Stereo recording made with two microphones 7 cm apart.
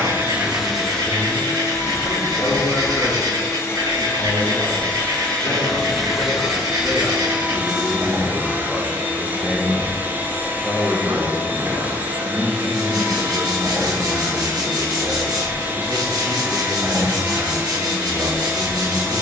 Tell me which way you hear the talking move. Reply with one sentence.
In this clip you hear the talking travel towards the right.